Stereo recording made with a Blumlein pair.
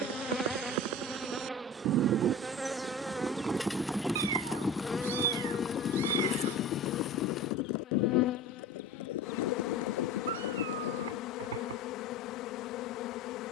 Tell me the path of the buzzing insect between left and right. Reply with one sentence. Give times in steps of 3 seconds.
In this clip you hear the buzzing insect in the centre from 0 s and on the left from 6 s.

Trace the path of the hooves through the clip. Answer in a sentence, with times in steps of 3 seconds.
In this clip you hear the hooves on the right from 0 s, in the centre from 3 s, on the left from 6 s and not at all from 12 s.